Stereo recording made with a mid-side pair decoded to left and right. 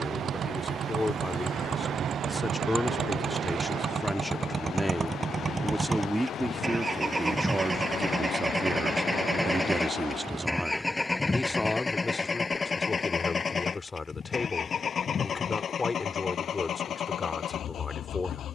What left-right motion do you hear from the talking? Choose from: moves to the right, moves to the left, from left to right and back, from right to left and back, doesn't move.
from left to right and back.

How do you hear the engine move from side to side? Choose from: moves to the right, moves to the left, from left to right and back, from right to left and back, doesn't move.
moves to the left.